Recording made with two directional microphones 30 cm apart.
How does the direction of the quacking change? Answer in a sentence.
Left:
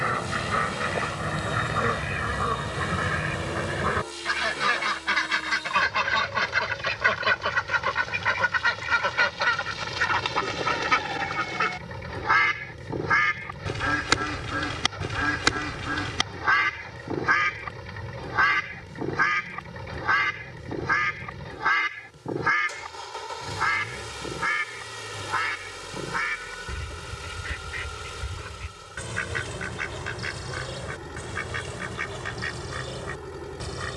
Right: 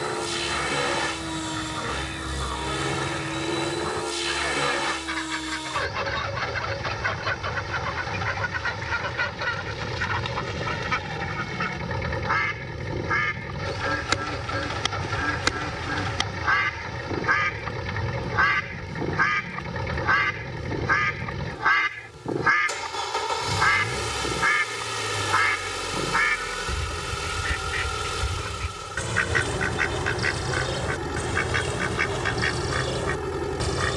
In this clip you hear the quacking move to the right.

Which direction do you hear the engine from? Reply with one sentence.
You can hear the engine on the right.